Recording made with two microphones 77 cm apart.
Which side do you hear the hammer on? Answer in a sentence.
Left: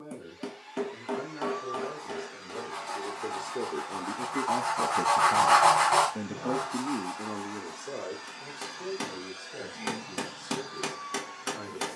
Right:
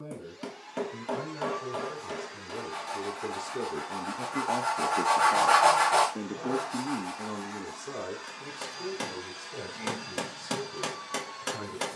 In this clip you hear the hammer in the centre.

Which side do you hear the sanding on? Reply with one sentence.
You can hear the sanding on the left.